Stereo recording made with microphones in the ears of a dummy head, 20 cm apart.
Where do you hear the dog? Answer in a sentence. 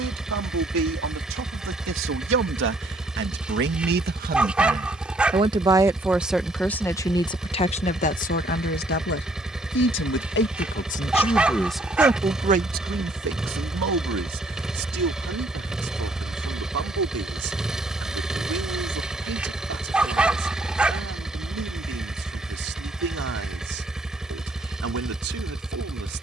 In this clip you hear the dog in the centre.